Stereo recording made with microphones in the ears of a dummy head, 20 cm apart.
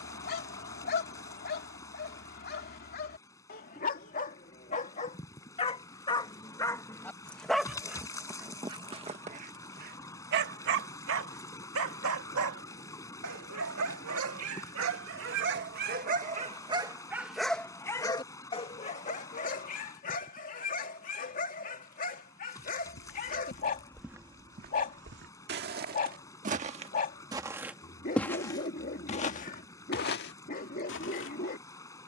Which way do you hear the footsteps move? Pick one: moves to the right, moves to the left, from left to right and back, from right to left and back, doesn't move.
from left to right and back.